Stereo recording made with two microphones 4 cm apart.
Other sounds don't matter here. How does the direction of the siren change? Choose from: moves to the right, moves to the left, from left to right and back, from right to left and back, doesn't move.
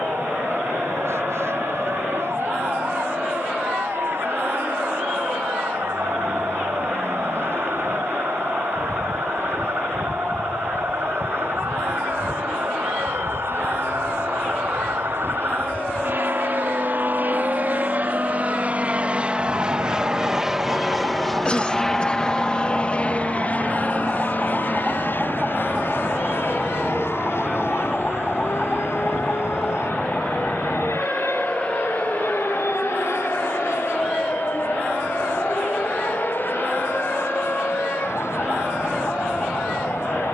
moves to the left.